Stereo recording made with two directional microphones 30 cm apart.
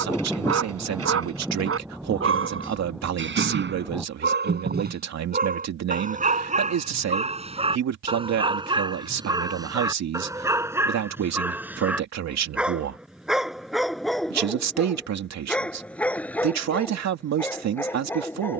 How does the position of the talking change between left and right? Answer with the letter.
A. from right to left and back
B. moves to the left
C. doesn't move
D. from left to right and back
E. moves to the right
C.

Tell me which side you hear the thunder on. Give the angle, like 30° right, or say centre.
centre.